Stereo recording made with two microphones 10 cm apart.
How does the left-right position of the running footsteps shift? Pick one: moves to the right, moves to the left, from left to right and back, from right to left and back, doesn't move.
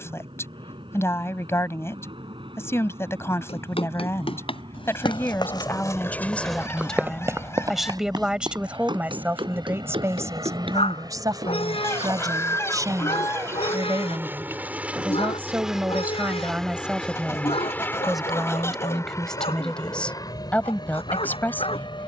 moves to the right.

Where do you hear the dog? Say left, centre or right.
left.